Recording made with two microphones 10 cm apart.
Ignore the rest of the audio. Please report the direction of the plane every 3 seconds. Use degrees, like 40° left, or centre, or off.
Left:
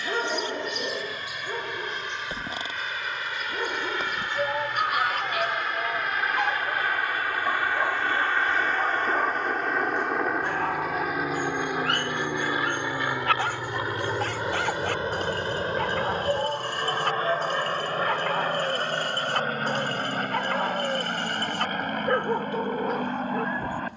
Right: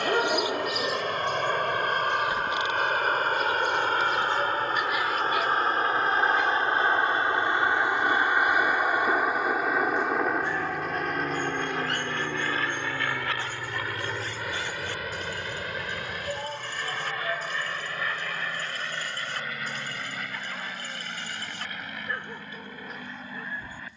60° right, 40° right, 20° right, centre, 20° left, 30° left, 40° left, 50° left.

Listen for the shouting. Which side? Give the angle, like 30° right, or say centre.
30° left.